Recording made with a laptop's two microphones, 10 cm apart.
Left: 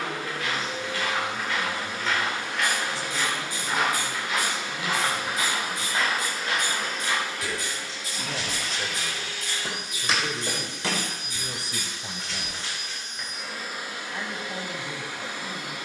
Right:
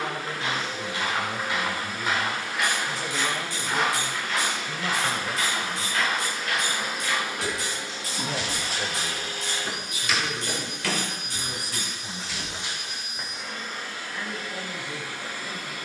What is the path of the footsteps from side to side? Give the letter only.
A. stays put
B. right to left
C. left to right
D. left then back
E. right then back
D.